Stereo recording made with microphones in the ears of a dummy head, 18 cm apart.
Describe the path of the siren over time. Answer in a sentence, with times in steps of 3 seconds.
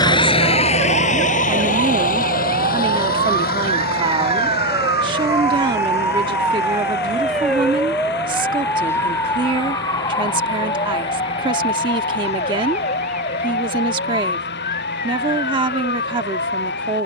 You can hear the siren on the right from 0 s, in the centre from 6 s and on the left from 9 s.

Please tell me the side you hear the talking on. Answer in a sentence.
You can hear the talking on the right.